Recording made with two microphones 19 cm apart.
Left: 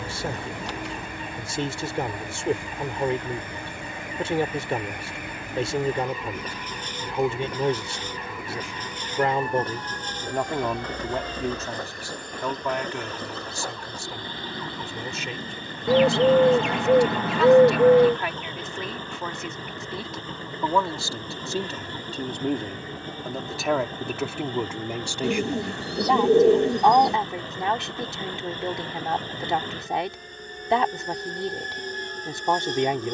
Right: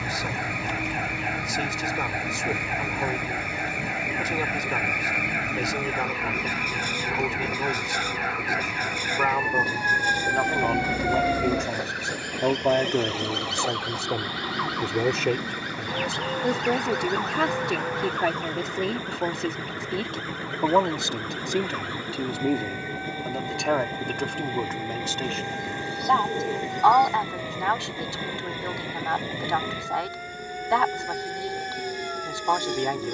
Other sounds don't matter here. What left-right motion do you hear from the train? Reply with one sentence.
In this clip you hear the train stay put.